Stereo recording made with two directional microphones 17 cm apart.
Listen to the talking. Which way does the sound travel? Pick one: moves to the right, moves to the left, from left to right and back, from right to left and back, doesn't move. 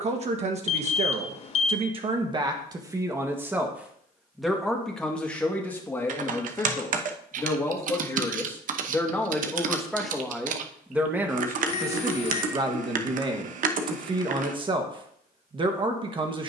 from right to left and back.